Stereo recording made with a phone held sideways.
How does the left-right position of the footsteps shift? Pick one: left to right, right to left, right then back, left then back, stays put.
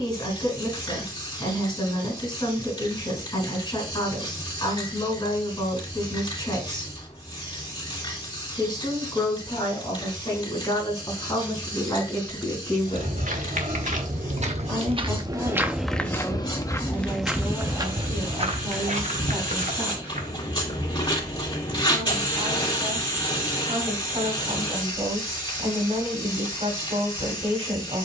left then back.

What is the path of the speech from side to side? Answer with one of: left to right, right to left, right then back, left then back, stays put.
left to right.